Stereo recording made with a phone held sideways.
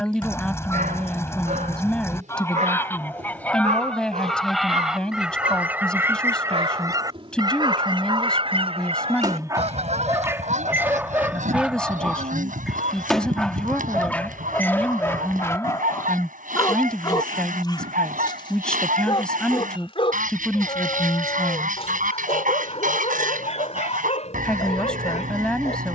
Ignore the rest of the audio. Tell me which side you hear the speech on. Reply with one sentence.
In this clip you hear the speech in the centre.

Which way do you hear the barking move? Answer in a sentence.
You can hear the barking go from the right side to the left.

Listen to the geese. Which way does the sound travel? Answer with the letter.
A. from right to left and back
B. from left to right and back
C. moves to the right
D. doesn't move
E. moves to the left
C.